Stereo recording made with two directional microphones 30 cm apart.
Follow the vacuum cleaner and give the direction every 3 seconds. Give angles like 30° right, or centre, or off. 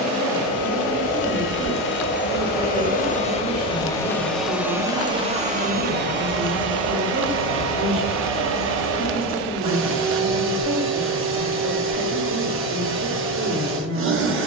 40° left, centre, 40° right, 40° right, 40° right.